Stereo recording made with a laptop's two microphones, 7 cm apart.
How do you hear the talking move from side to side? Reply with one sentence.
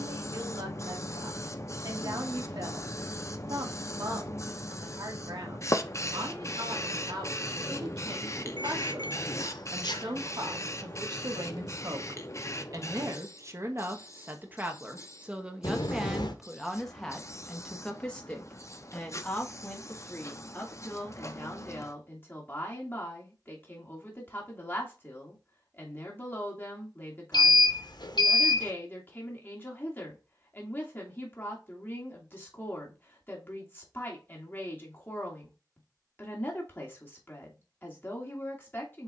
In this clip you hear the talking go from the right side to the left.